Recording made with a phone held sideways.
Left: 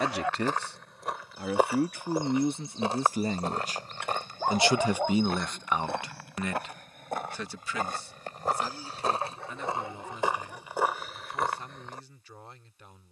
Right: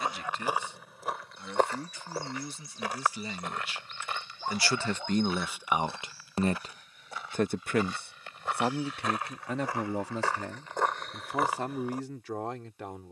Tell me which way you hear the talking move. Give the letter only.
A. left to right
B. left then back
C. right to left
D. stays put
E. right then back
A.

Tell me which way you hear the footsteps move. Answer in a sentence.
You can hear the footsteps go left and come back.